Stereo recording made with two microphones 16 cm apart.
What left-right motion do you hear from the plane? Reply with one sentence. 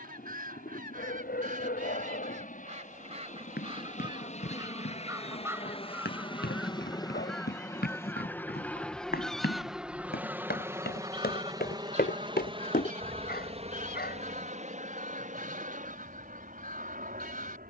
You can hear the plane move from left to right.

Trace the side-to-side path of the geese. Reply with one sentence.
In this clip you hear the geese go left and come back.